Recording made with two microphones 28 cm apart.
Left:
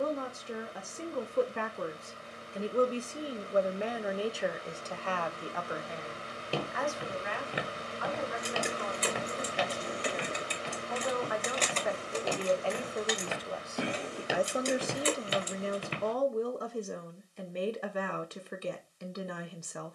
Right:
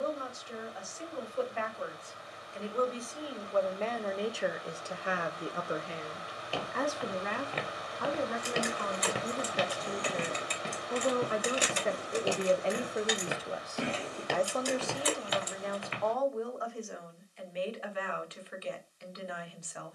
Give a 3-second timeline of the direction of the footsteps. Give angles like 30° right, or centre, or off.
off, off, 10° left, 40° right, 10° right, 30° left, off.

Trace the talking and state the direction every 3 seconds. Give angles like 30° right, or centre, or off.
50° left, centre, 50° right, 40° right, 10° right, 40° left, 50° left.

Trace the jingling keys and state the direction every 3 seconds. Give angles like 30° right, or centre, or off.
off, off, 40° left, 10° left, 10° left, 30° left, off.